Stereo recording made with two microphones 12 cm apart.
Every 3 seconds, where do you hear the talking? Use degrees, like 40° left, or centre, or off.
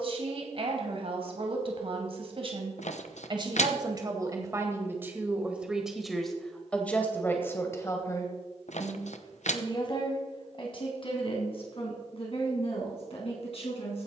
50° right, 20° right, 20° left, 40° left, 50° left.